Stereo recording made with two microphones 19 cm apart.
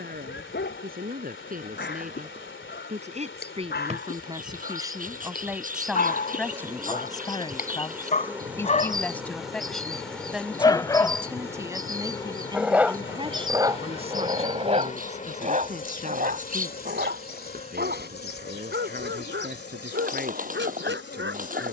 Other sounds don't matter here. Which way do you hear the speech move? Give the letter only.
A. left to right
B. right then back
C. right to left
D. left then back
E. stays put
D.